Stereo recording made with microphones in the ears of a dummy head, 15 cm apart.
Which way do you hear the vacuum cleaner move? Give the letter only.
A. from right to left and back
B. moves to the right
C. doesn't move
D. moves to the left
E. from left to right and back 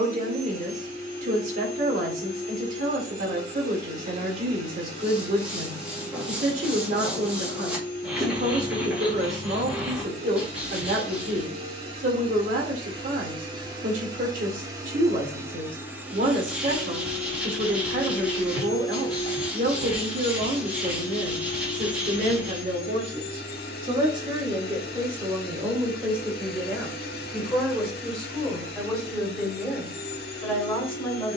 D.